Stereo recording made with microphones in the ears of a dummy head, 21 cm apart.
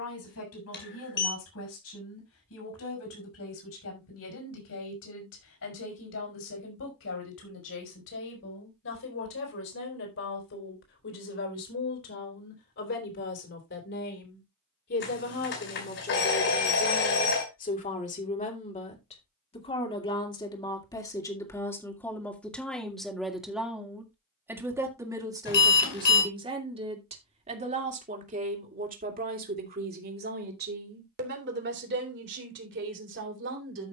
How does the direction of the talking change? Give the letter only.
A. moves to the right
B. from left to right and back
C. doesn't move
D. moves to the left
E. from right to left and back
A.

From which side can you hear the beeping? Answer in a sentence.
You can hear the beeping on the left.